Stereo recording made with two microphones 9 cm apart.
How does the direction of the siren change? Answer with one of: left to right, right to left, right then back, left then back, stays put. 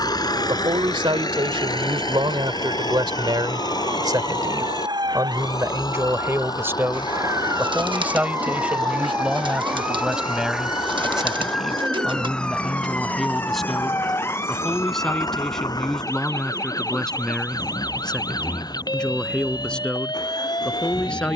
right to left.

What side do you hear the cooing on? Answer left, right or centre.
right.